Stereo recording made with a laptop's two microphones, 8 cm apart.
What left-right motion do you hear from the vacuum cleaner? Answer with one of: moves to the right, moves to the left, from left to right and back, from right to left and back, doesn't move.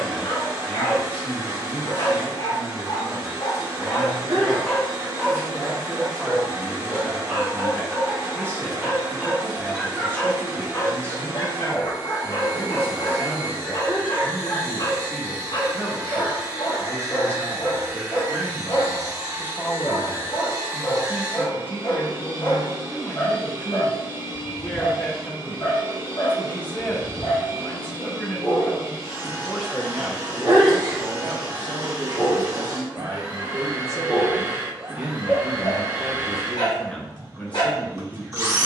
doesn't move.